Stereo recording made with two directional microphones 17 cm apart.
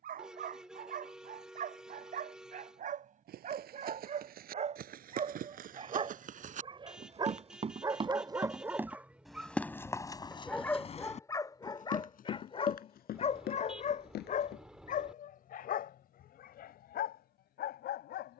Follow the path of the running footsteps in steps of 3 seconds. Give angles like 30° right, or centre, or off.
off, 60° right, 40° right, 30° left, 60° left, off.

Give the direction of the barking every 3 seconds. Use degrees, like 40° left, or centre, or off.
50° right, 40° right, 20° right, 10° left, 40° left, 60° left.